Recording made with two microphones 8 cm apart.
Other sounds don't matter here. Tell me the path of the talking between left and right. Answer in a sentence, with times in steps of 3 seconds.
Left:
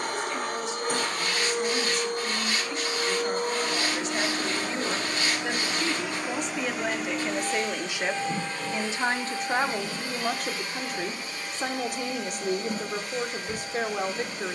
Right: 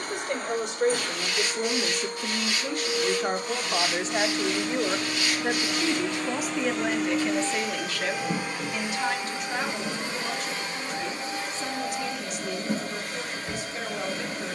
You can hear the talking on the right from 0 s, in the centre from 6 s and on the left from 9 s.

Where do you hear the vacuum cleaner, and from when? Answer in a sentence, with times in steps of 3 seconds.
In this clip you hear the vacuum cleaner on the left from 0 s, in the centre from 6 s and on the right from 9 s.